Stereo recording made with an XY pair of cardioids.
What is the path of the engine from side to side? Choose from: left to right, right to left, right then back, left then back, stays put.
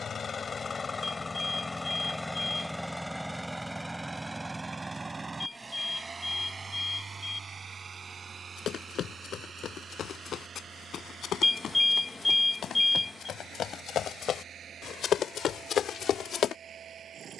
left to right.